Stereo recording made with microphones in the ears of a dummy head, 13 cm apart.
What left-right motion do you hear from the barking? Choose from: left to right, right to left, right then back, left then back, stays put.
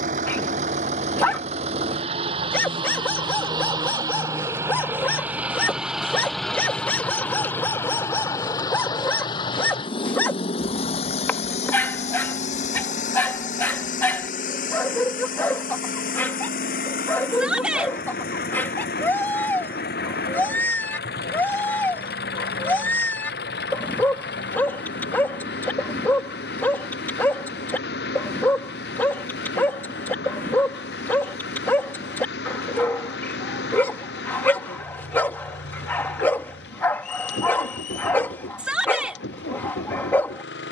stays put.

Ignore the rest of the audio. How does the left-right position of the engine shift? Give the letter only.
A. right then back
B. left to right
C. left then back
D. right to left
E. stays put
D.